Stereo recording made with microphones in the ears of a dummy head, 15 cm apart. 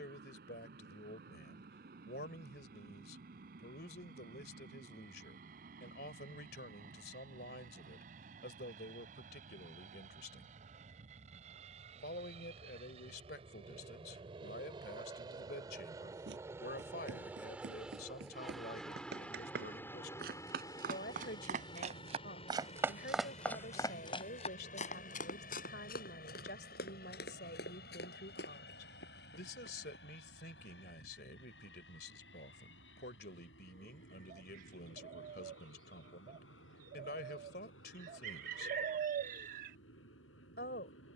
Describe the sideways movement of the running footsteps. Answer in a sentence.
In this clip you hear the running footsteps travel towards the left.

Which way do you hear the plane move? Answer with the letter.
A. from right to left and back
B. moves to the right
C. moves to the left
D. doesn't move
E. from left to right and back
C.